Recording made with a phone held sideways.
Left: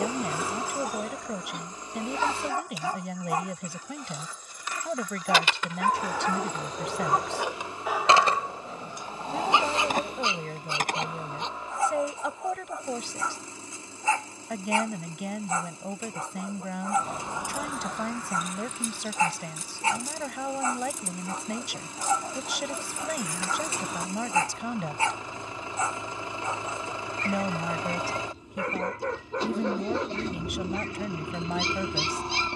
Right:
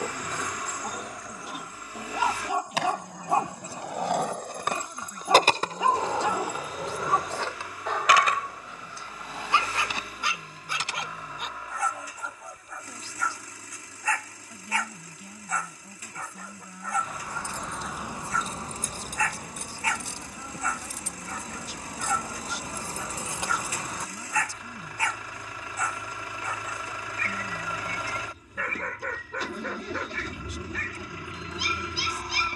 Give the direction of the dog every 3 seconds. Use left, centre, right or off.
centre, right, centre, left, left, left, left, left, left, left, left.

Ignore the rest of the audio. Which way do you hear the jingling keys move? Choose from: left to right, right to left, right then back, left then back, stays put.
right then back.